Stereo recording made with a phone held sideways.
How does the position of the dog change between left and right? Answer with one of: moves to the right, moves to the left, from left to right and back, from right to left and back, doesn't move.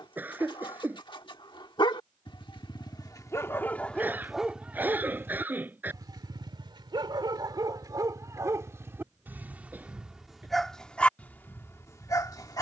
from left to right and back.